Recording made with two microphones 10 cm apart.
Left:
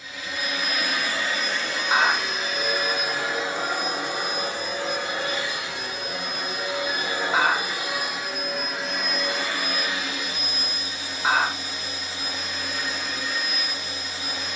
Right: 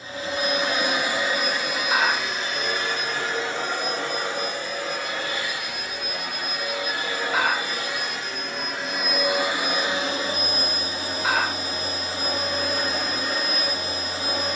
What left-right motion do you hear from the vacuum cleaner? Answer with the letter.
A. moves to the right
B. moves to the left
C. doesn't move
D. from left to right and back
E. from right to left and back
E.